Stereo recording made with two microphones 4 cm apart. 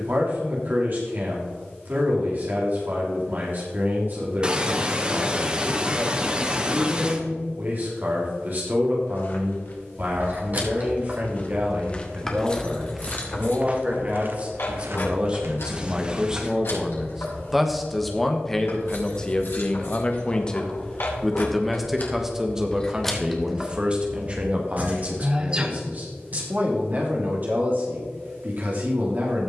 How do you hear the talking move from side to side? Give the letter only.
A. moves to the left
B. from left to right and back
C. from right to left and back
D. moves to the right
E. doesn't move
C.